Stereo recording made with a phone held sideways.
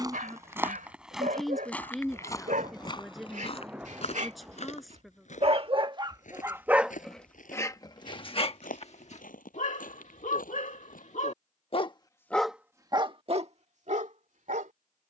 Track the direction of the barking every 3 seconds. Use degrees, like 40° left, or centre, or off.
70° right, 50° right, 10° left, 60° left, 40° right.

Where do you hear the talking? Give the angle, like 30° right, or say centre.
centre.